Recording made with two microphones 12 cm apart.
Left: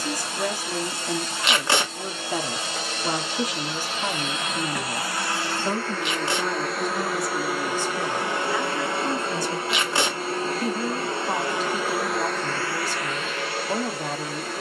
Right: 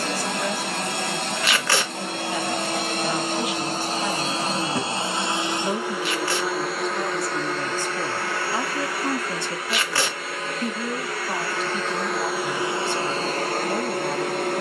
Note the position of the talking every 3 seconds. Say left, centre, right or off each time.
left, left, centre, centre, left.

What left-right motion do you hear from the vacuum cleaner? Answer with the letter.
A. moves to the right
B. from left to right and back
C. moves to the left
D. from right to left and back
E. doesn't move
D.